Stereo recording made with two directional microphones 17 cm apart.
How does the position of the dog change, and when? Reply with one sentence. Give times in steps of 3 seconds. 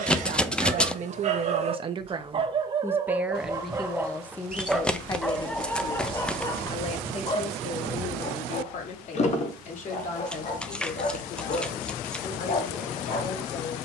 In this clip you hear the dog on the right from 0 s, in the centre from 3 s and on the left from 6 s.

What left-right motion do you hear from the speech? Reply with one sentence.
You can hear the speech travel towards the left.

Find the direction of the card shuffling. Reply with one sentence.
You can hear the card shuffling in the centre.